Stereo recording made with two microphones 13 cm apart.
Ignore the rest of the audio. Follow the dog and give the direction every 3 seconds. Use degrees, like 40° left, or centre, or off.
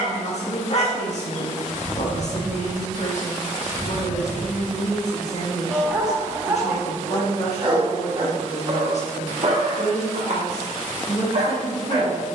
40° left, 10° left, 30° right, 60° right.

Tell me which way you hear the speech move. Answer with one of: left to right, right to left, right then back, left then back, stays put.
stays put.